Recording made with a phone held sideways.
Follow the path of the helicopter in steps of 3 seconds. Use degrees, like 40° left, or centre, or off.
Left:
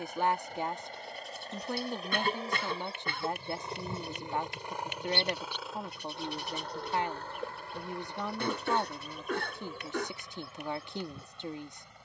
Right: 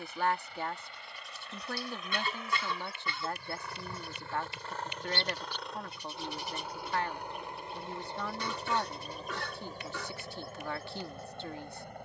40° left, 20° left, 20° right, 40° right.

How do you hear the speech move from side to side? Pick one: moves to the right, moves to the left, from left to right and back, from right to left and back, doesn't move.
doesn't move.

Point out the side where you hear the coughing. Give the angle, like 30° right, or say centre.
50° left.